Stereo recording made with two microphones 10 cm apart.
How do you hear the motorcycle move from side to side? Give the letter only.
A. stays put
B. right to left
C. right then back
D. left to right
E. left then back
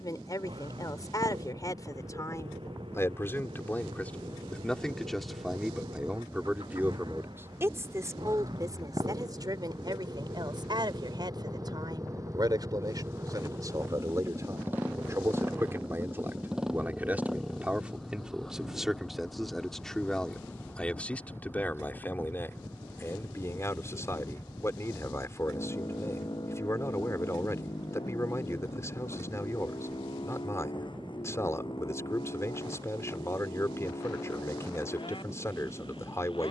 B.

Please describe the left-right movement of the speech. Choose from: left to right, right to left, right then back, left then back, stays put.
right then back.